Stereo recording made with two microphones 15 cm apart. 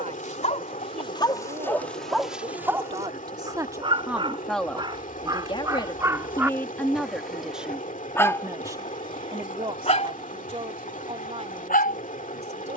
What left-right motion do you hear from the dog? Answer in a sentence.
In this clip you hear the dog go right and come back.